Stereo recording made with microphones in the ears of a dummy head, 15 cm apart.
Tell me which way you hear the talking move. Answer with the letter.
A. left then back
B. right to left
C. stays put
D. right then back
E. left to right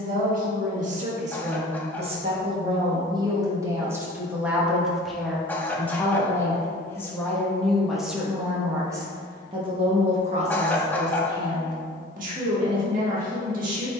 A.